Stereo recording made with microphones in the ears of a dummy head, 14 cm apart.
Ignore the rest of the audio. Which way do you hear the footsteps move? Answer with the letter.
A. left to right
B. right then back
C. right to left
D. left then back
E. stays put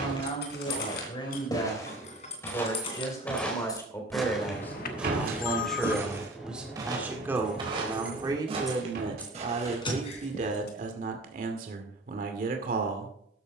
A.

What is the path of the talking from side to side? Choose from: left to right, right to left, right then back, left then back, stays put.
left to right.